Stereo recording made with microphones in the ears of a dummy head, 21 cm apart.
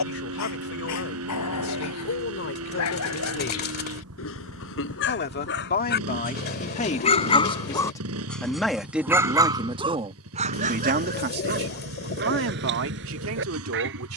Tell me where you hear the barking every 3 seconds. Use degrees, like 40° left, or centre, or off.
70° left, 60° left, 20° left, 30° right, 50° right.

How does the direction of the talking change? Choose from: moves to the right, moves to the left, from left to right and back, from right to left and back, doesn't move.
moves to the right.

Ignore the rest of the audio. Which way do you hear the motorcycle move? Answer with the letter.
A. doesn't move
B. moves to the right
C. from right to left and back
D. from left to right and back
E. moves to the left
A.